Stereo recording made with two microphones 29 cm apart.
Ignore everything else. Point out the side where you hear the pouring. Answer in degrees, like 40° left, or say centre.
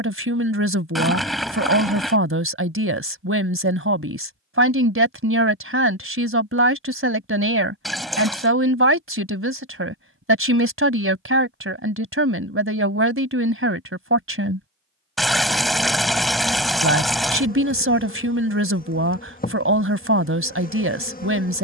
centre.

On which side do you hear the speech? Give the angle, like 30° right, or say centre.
50° right.